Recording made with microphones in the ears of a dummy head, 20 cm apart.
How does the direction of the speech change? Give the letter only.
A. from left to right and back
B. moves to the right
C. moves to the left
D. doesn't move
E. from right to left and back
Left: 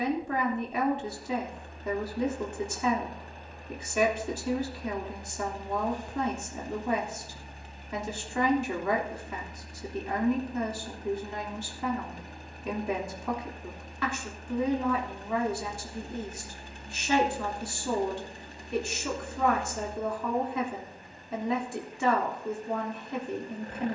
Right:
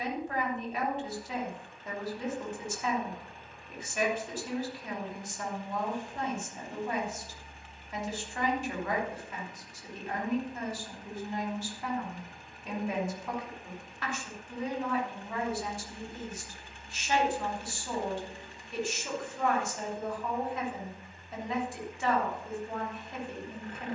D.